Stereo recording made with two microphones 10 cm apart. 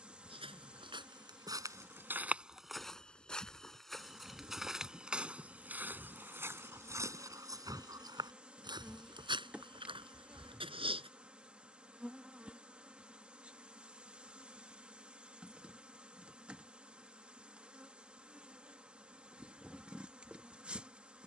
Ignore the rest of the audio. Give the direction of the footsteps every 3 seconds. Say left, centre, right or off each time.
right, centre, right, right, off, off, off.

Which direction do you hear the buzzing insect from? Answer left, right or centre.
centre.